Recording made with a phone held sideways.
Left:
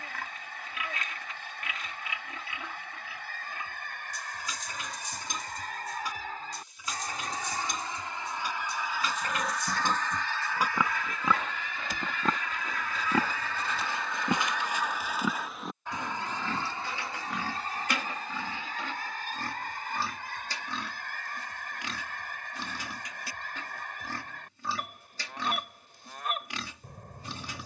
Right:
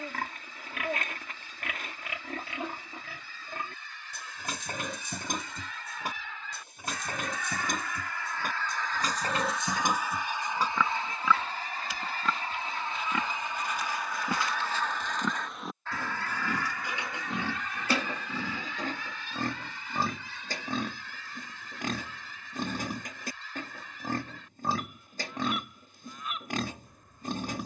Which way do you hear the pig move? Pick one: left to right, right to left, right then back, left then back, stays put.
left then back.